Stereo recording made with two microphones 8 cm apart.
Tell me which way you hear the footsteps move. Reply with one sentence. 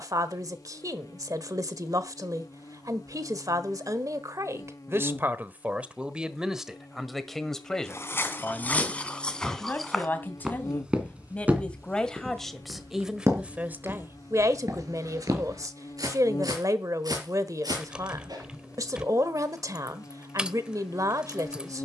In this clip you hear the footsteps move from left to right.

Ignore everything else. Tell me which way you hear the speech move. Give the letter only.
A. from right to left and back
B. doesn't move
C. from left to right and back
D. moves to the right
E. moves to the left
A.